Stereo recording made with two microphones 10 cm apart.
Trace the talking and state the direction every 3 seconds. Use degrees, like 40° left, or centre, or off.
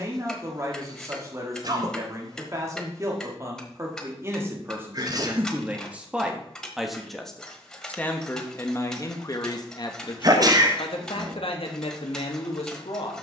30° right, 20° right, 10° left, 50° left, 70° left.